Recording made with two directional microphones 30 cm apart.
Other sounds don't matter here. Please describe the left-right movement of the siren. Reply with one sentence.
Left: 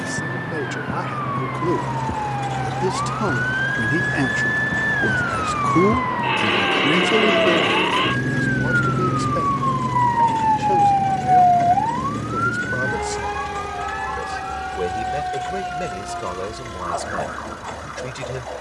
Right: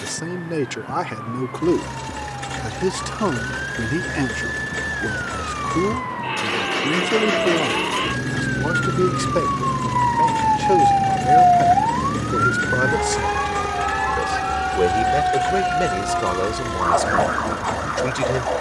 You can hear the siren move to the right.